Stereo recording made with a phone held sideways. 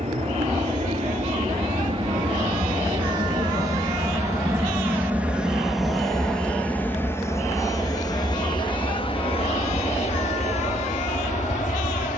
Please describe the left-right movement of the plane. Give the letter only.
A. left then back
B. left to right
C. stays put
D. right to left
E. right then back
D.